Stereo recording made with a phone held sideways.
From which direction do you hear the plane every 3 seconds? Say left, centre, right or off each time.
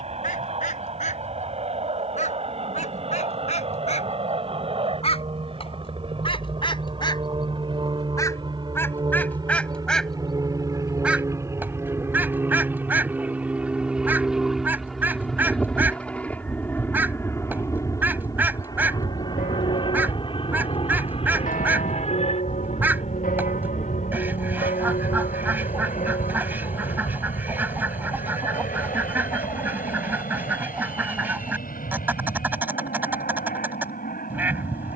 right, right, right, right, centre, centre, left, left, left, left, left, left.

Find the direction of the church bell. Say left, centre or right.
left.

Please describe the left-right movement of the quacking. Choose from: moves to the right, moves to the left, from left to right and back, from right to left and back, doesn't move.
moves to the right.